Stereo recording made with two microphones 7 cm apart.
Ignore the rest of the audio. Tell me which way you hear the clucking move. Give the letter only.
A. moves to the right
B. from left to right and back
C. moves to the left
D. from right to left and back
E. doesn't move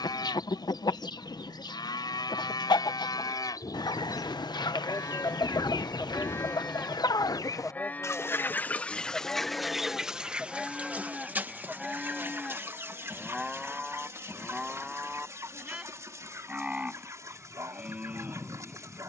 A.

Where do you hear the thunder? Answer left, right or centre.
left.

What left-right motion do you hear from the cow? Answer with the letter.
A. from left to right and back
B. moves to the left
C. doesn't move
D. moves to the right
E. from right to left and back
D.